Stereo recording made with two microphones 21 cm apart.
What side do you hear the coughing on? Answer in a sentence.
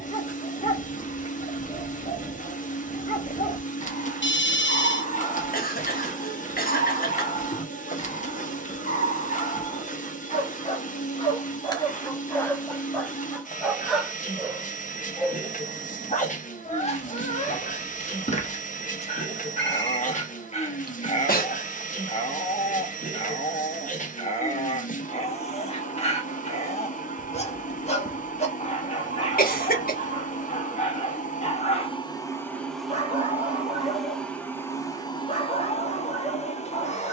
You can hear the coughing on the left.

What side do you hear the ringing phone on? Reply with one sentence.
In this clip you hear the ringing phone on the left.